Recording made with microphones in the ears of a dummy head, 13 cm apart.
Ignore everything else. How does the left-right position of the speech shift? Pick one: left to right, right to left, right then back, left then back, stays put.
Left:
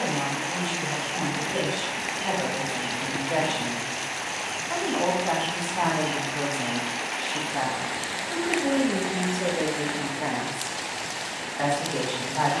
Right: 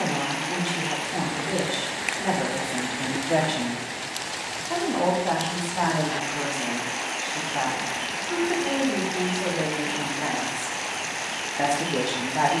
left then back.